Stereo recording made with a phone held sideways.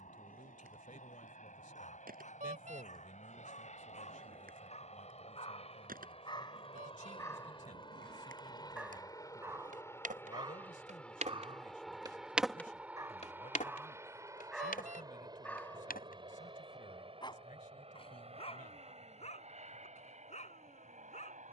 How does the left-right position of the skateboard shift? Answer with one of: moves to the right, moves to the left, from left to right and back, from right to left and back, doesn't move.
moves to the left.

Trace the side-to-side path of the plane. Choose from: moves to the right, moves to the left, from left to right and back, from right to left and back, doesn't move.
moves to the right.